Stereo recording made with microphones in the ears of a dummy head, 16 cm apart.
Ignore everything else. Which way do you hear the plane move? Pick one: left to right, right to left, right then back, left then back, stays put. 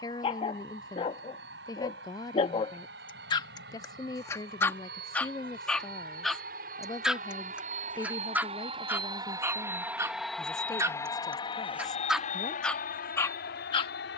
right to left.